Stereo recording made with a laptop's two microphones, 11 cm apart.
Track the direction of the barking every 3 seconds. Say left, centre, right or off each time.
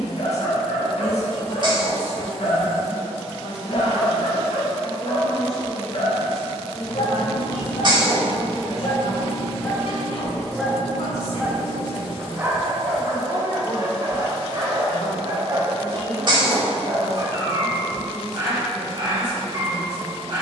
left, left, left, centre, right, right, right.